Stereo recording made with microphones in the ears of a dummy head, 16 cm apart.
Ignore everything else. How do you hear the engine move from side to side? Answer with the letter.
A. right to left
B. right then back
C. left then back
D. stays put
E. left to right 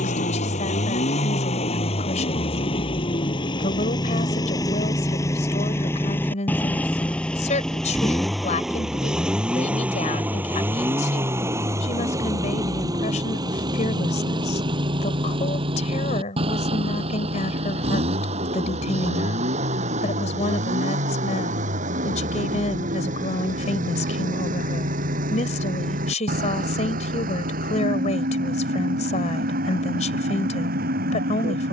E.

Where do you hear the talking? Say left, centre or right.
left.